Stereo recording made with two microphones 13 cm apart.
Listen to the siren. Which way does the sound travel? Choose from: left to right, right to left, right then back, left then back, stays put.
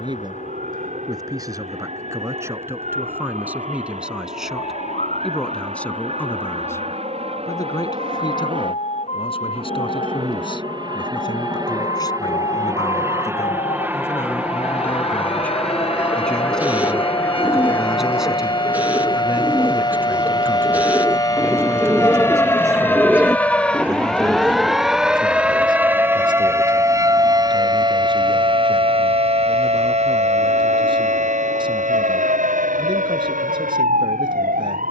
left to right.